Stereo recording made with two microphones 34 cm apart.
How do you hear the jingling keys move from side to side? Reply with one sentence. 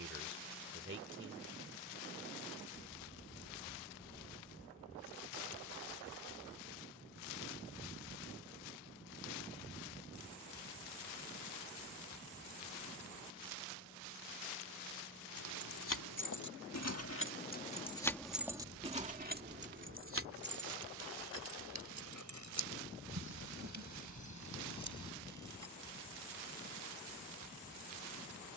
In this clip you hear the jingling keys move to the right.